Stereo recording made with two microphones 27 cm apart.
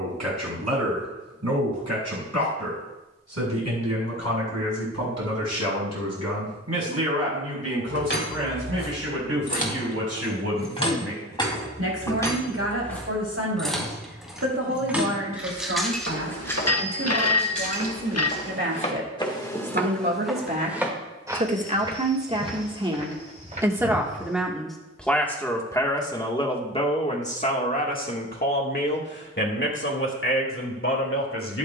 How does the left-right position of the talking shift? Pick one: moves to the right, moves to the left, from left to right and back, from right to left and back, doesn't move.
moves to the left.